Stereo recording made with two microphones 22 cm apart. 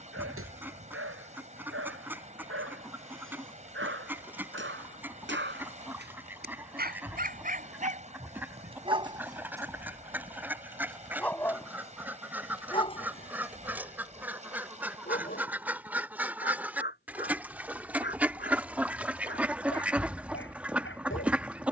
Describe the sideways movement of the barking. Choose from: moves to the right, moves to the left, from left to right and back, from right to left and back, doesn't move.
moves to the left.